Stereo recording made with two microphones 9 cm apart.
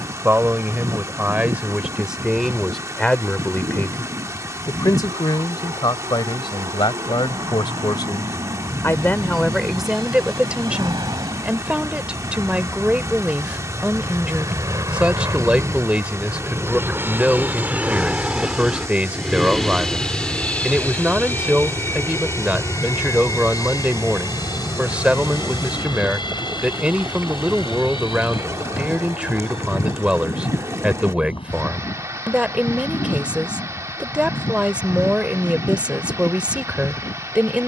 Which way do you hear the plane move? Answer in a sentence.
In this clip you hear the plane travel towards the left.